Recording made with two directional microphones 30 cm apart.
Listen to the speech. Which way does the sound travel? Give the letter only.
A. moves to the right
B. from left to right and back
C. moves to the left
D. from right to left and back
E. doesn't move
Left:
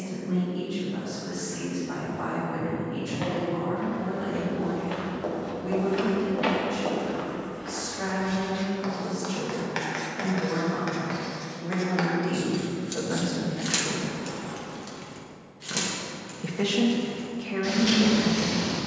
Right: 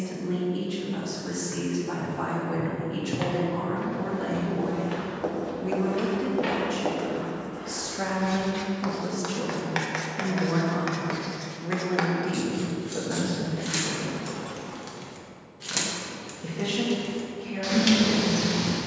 C.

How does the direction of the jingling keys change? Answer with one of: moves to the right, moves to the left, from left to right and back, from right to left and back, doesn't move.
moves to the right.